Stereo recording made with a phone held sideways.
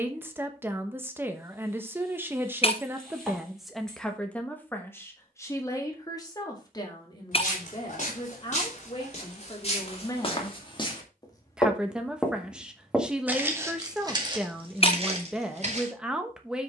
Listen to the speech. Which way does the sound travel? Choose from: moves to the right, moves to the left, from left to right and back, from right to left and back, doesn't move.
from right to left and back.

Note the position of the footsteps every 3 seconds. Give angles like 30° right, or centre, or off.
off, off, 50° left, 40° left, 20° right, 50° right.